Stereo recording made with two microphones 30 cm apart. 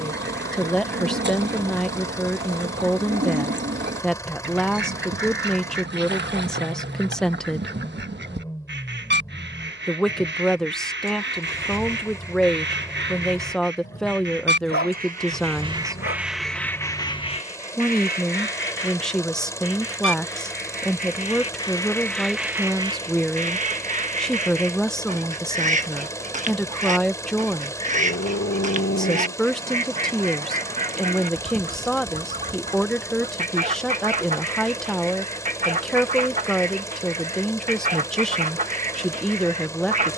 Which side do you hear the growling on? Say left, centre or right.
left.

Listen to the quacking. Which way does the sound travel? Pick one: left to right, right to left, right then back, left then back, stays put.
left then back.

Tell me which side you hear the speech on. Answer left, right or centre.
centre.